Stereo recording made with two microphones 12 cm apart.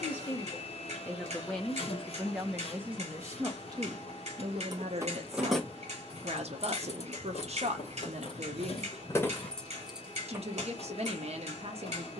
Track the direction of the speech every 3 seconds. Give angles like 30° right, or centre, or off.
centre, 40° right, 60° right, 60° right.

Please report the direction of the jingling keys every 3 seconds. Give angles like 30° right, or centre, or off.
off, 10° right, 50° left, centre.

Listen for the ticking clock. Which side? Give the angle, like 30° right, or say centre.
60° right.